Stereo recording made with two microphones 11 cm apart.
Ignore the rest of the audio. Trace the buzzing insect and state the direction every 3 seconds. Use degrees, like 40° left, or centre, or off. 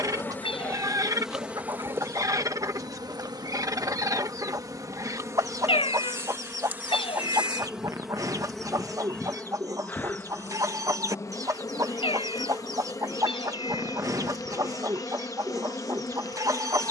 10° right, 30° right, 10° right, 20° left, 30° left, 30° left.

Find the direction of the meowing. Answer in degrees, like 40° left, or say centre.
60° left.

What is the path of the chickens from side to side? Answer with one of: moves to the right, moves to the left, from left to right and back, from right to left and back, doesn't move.
doesn't move.